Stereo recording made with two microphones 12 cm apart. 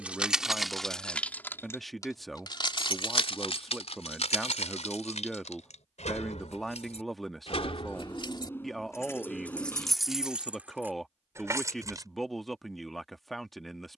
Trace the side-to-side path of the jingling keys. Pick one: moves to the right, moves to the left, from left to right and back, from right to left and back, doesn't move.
from right to left and back.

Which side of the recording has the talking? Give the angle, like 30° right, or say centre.
centre.